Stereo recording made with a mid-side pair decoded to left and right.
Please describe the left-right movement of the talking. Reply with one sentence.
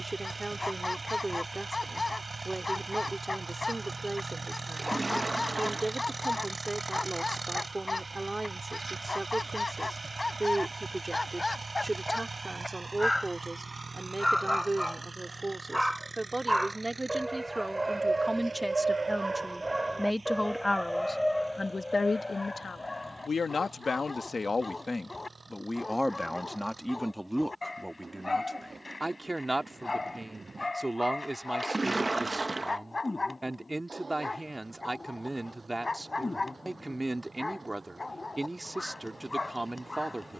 You can hear the talking go left and come back.